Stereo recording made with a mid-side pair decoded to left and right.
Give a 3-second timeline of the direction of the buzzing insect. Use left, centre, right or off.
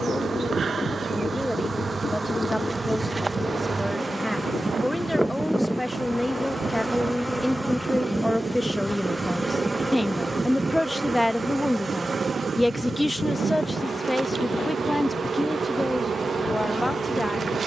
right, centre, centre, right, right, right.